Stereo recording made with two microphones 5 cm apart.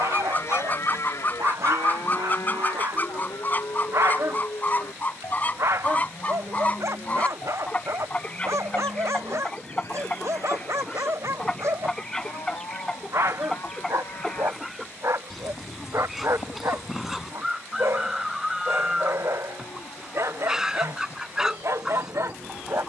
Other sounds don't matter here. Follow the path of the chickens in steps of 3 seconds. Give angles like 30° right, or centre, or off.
30° left, 30° left, 20° left, 10° left, centre, centre, 10° right, 10° right.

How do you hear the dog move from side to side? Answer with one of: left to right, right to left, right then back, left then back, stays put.
stays put.